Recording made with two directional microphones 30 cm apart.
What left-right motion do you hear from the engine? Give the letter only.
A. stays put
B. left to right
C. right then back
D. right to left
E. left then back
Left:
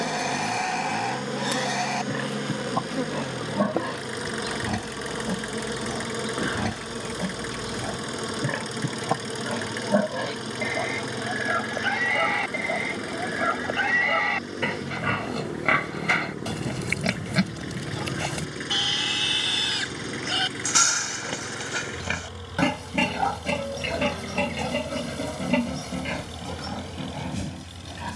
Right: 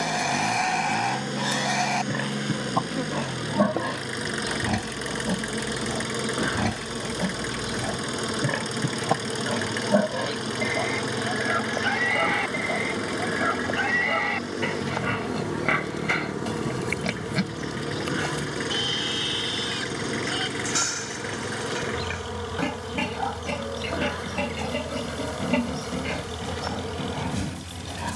A.